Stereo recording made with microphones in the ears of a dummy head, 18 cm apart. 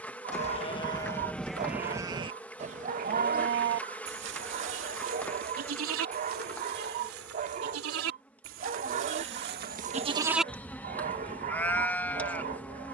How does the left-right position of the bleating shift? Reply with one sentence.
You can hear the bleating go right and come back.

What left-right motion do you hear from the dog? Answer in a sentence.
In this clip you hear the dog stay put.